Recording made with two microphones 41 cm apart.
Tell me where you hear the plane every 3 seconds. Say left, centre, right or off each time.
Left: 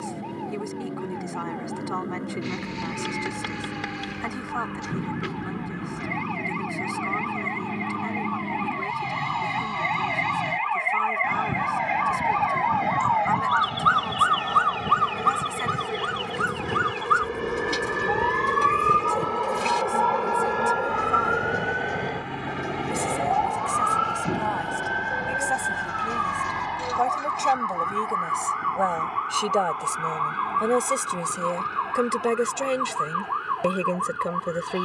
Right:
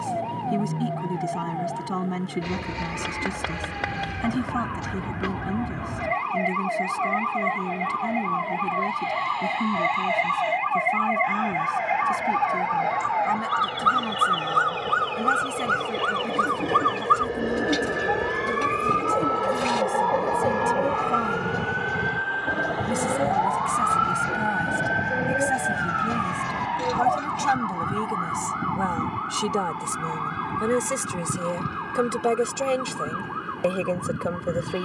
left, left, left, left, left, left, centre, right, right, right, right, right.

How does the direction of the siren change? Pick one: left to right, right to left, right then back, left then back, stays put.
right to left.